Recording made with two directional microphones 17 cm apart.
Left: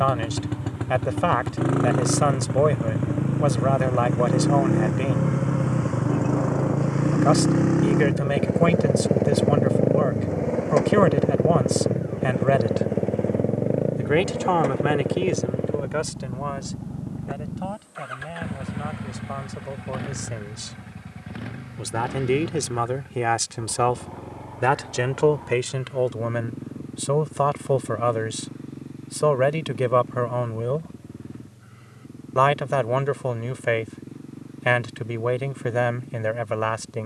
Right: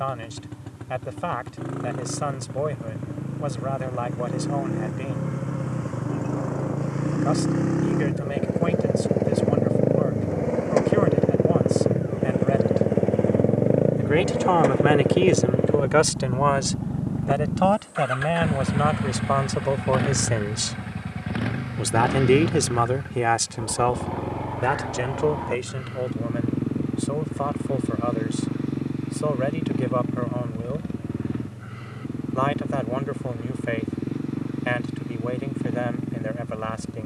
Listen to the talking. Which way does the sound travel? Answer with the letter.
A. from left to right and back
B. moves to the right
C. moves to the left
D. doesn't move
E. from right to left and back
A.